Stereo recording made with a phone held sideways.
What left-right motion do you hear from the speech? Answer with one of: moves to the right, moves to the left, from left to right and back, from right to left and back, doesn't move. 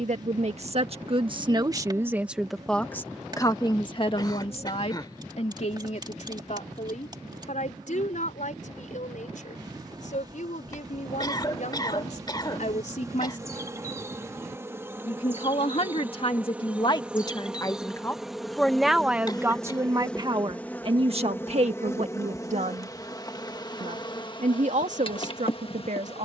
from right to left and back.